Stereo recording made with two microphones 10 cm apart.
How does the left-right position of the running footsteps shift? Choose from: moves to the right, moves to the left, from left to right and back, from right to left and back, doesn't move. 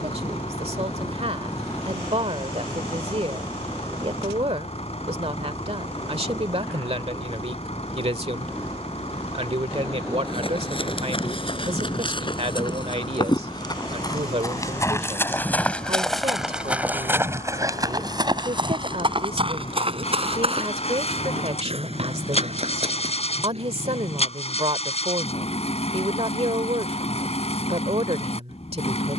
moves to the right.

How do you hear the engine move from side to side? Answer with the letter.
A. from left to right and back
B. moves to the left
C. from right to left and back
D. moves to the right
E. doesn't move
E.